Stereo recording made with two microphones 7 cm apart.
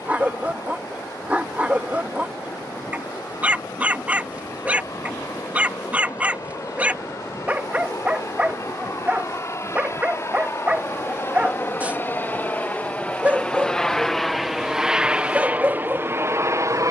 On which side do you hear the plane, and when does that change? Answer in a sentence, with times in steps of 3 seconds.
In this clip you hear the plane on the left from 0 s, in the centre from 12 s and on the right from 15 s.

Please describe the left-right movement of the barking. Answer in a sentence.
You can hear the barking stay put.